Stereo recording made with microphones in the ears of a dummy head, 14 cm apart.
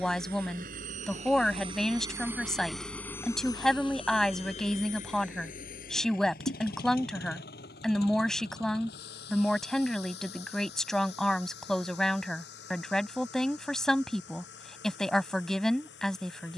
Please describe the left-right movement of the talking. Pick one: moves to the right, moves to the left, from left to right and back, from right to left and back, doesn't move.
doesn't move.